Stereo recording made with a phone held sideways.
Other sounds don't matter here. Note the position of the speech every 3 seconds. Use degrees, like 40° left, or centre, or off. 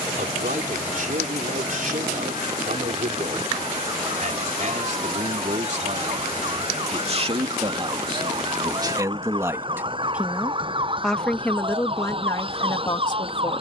60° right, 50° right, 40° right, centre, 30° left.